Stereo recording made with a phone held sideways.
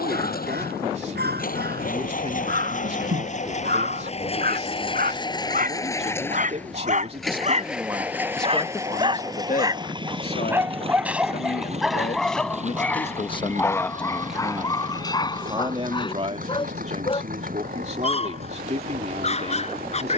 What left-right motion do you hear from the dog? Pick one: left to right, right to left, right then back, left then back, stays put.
right to left.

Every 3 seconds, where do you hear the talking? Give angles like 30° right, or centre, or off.
40° right, 40° right, 20° right, 60° left, 20° left, 40° right, 40° right.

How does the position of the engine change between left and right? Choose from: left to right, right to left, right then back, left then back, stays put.
left to right.